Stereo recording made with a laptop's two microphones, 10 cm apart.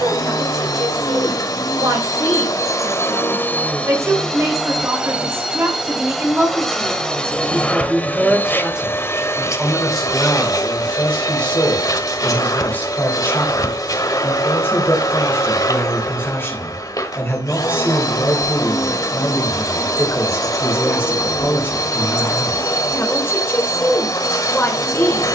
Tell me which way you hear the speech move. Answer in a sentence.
You can hear the speech move from right to left.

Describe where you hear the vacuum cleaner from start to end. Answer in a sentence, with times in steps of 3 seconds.
You can hear the vacuum cleaner on the left from 0 s, in the centre from 3 s and on the left from 9 s.